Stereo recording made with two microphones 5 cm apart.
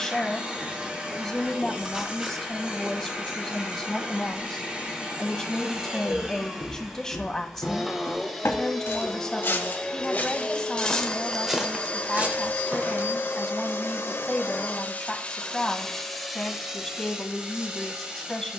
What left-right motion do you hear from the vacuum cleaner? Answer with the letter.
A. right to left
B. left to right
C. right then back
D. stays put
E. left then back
E.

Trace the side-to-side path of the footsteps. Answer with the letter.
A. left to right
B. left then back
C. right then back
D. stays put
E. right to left
B.